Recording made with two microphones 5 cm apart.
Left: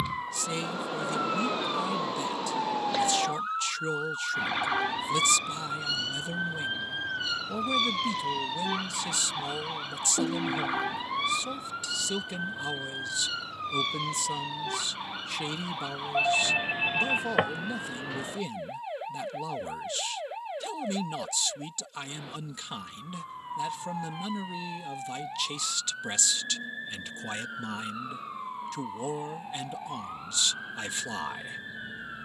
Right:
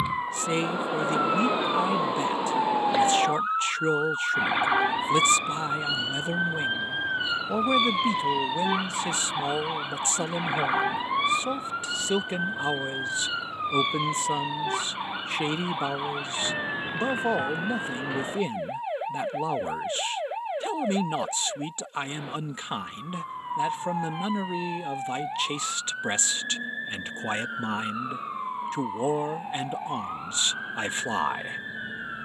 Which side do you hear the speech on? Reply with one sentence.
You can hear the speech on the right.